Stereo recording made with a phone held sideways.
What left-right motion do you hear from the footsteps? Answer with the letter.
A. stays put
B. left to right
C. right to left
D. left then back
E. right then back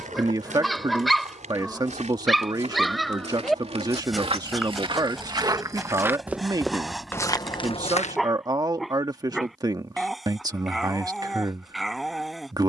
C.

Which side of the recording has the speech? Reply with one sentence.
In this clip you hear the speech on the right.